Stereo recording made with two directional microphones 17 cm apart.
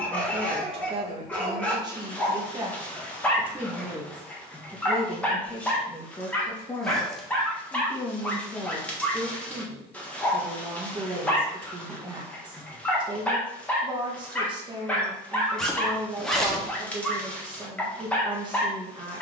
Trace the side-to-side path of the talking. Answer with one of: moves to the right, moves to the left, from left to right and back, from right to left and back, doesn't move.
from right to left and back.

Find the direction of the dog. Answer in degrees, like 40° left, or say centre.
10° left.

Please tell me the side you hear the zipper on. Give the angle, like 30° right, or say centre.
centre.